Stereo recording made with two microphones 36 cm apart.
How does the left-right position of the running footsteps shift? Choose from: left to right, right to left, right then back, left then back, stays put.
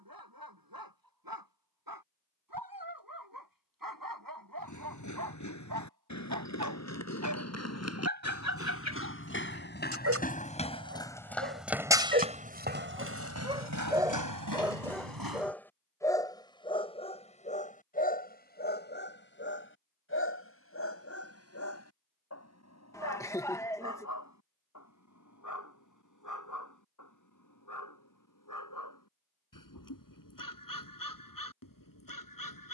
left to right.